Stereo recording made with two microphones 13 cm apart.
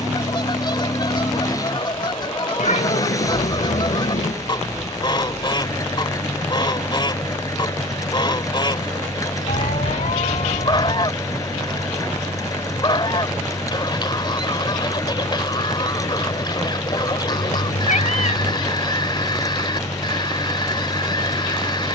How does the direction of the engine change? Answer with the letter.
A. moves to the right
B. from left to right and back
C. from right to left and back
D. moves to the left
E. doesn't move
E.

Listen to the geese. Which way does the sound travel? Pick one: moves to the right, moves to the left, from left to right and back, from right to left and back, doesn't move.
doesn't move.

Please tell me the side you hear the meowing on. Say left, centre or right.
left.